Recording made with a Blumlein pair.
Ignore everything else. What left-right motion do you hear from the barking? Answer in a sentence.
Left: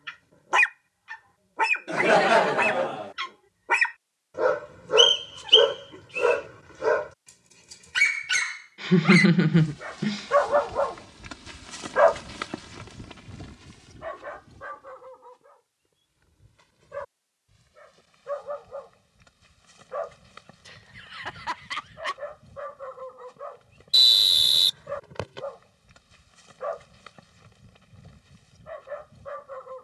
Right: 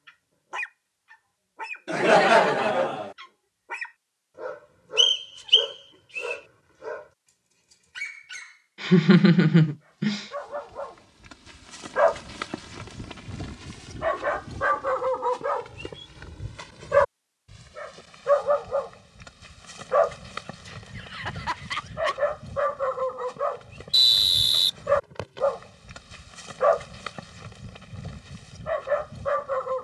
In this clip you hear the barking go from the left side to the right.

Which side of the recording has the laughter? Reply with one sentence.
You can hear the laughter in the centre.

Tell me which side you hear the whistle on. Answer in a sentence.
You can hear the whistle in the centre.